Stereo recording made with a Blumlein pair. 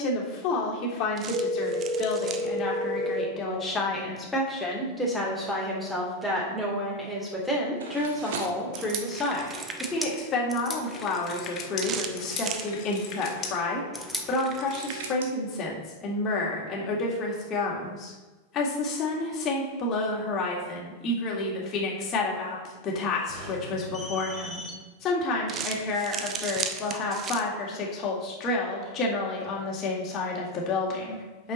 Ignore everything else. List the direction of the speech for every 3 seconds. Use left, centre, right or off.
left, centre, centre, left, left, left, left, left, left, left, left.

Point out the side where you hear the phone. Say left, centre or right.
right.